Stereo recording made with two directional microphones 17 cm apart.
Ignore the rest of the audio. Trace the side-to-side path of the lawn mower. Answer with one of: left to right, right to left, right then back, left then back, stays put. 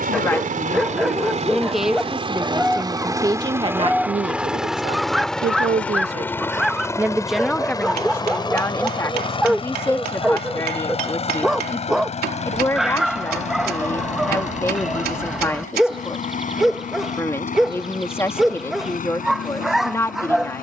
right to left.